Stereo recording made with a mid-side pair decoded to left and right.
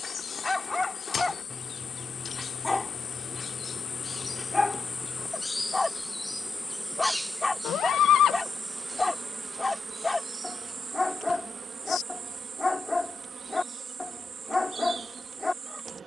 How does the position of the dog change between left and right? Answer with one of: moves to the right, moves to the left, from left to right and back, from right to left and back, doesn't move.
doesn't move.